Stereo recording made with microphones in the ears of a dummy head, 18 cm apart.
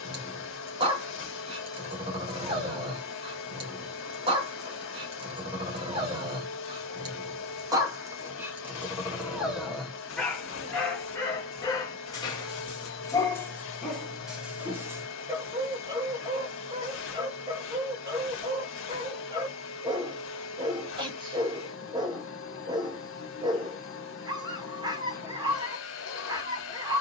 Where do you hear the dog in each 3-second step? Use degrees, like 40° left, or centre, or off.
30° right, 30° right, 20° right, 10° left, 10° left, 20° right, 20° right, 20° right, 20° right.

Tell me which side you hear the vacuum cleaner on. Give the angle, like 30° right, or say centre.
70° left.